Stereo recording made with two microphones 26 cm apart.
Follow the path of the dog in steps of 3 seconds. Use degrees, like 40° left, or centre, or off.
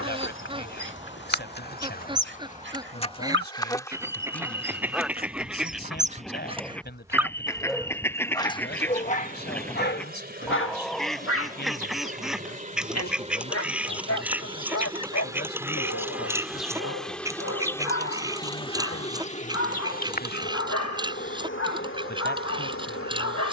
40° right, 40° right, centre, 40° left, 70° left, 70° left, 70° left, 70° left.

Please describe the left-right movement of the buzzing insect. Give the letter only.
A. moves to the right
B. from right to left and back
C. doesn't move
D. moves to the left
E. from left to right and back
E.